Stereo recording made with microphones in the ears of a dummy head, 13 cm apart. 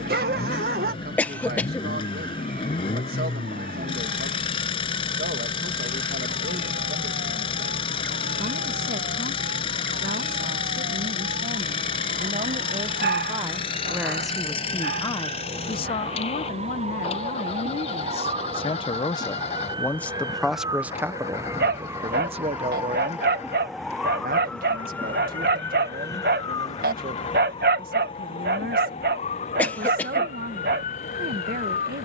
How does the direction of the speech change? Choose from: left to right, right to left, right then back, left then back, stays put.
left then back.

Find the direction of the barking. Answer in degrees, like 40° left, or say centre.
70° right.